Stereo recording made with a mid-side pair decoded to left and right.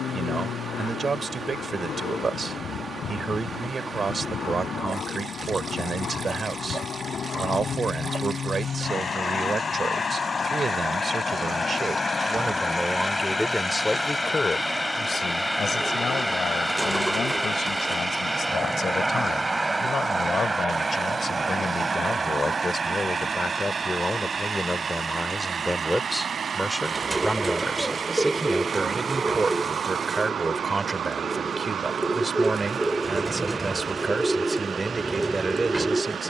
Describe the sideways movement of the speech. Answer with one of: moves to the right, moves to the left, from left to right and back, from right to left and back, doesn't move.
from right to left and back.